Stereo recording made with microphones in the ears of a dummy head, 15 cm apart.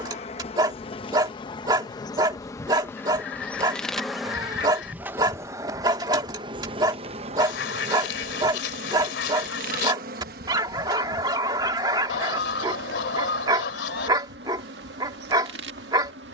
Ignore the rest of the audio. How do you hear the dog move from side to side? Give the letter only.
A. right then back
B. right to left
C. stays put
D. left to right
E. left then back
C.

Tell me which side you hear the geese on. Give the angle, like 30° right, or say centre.
70° left.